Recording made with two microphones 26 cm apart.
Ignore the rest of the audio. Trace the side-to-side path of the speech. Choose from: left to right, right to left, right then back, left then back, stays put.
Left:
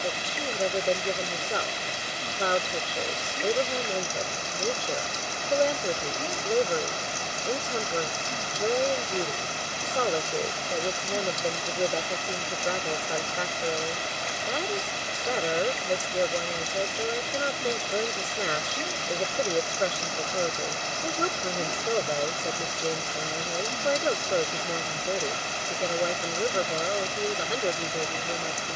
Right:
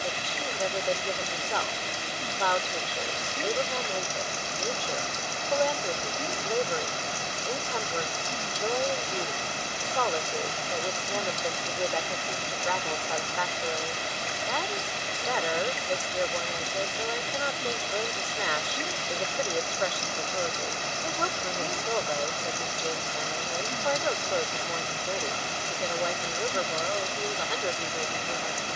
stays put.